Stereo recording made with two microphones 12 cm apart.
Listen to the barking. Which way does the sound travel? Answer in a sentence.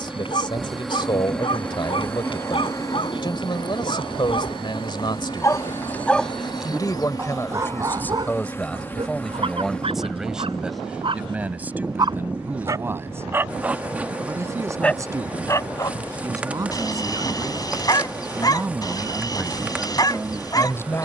In this clip you hear the barking move from left to right and back again.